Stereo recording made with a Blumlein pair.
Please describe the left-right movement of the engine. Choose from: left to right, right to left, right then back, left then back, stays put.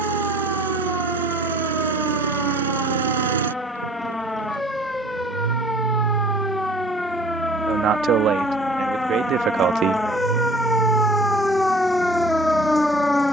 stays put.